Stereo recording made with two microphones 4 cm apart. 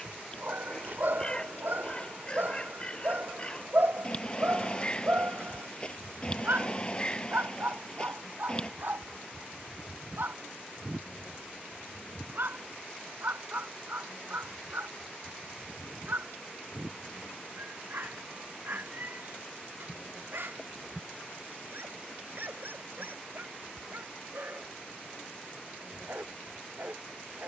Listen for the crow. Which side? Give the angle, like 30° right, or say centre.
20° left.